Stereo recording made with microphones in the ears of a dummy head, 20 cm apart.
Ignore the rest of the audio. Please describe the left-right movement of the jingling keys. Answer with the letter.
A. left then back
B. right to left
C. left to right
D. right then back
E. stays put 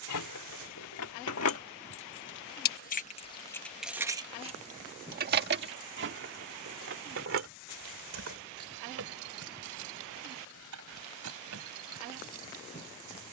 C.